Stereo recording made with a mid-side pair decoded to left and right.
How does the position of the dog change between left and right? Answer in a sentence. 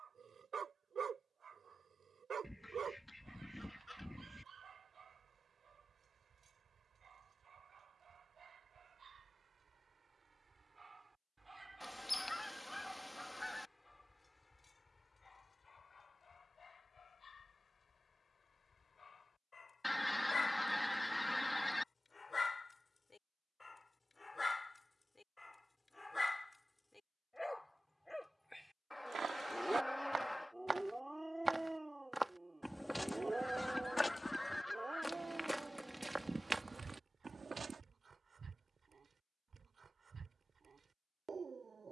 In this clip you hear the dog move from right to left and back again.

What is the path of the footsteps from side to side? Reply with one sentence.
In this clip you hear the footsteps move from right to left and back again.